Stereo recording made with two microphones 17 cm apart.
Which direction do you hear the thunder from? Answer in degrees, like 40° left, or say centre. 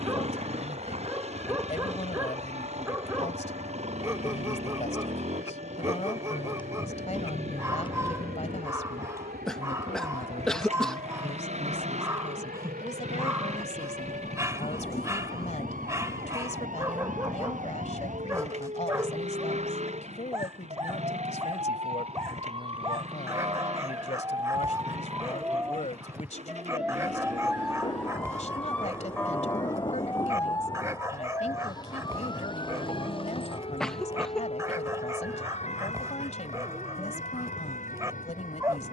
30° left.